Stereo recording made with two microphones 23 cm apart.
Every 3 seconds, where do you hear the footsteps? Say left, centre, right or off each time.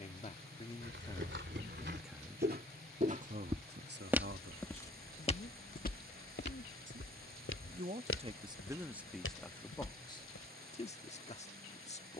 right, centre, left, left.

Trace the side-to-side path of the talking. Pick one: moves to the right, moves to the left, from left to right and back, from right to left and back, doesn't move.
from left to right and back.